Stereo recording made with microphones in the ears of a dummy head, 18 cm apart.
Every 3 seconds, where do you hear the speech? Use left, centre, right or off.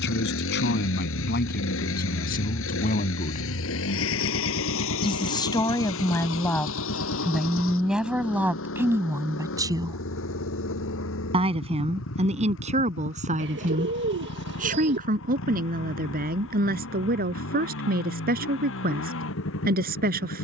left, left, centre, right, right, right, right.